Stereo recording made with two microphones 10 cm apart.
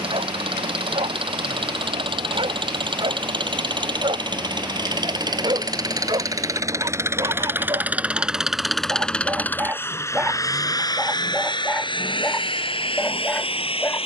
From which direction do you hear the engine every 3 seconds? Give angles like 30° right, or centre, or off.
60° right, 50° right, 20° right, 40° left, 70° left.